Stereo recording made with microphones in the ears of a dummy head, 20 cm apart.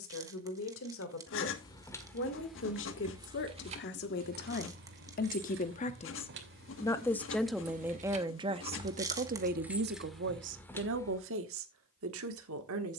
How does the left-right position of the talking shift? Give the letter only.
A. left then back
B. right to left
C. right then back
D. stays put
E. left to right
E.